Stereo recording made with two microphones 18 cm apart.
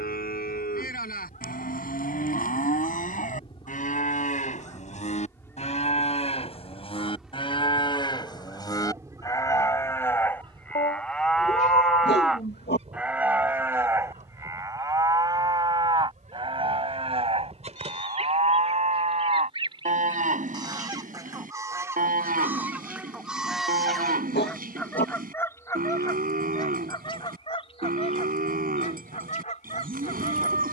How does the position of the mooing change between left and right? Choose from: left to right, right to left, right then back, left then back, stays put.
left to right.